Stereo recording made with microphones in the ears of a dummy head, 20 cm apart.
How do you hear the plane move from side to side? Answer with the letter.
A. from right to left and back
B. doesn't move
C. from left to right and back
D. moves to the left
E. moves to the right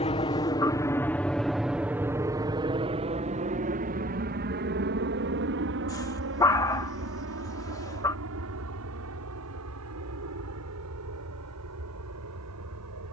E.